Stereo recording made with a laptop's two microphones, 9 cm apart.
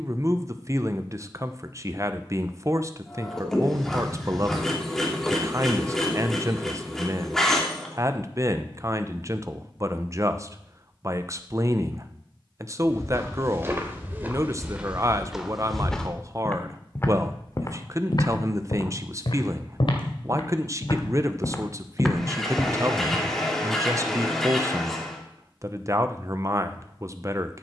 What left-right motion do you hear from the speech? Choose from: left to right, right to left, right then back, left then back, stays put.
stays put.